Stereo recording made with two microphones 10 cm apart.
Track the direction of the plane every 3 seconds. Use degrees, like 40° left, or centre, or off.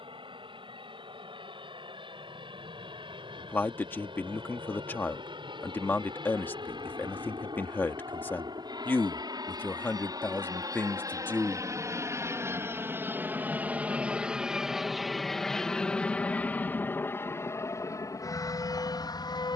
70° right, 60° right, 50° right, 40° right, 20° right, 20° left, 40° left.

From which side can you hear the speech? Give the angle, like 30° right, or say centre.
20° left.